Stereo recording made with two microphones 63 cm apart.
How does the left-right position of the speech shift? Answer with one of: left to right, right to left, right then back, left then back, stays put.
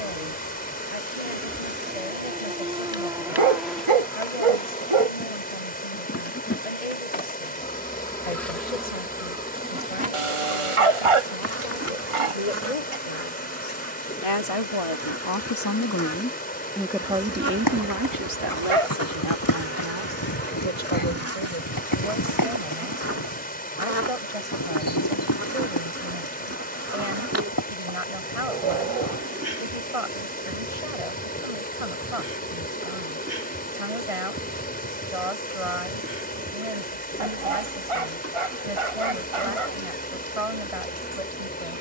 left to right.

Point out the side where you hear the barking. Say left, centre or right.
right.